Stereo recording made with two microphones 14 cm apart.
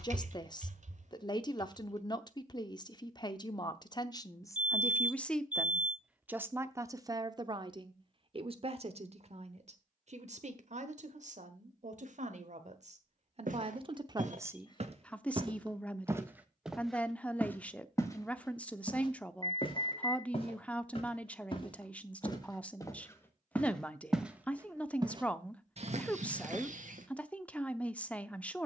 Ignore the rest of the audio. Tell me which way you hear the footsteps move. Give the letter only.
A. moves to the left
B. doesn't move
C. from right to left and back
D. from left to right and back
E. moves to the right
C.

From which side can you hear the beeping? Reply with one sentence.
In this clip you hear the beeping on the left.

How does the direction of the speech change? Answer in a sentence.
You can hear the speech go right and come back.